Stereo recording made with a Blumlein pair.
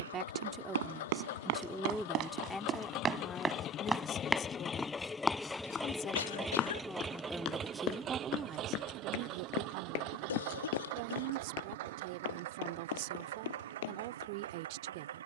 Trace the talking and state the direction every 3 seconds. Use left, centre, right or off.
centre, left, centre, right, right.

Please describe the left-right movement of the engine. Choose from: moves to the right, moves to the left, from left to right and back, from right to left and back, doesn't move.
moves to the right.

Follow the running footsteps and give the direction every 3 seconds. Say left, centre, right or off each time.
right, centre, left, left, left.